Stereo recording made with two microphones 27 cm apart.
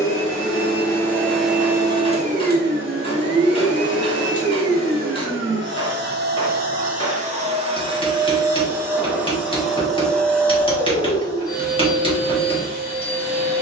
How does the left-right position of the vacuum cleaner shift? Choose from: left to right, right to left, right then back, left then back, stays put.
right then back.